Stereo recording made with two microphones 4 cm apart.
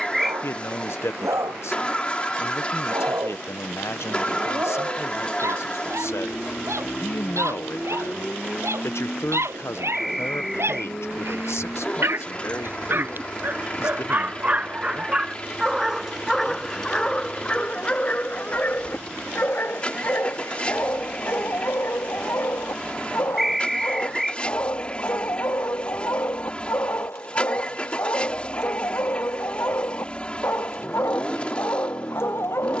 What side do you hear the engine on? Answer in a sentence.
In this clip you hear the engine on the left.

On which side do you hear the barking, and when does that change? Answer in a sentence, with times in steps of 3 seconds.
You can hear the barking on the right from 0 s, in the centre from 15 s and on the left from 18 s.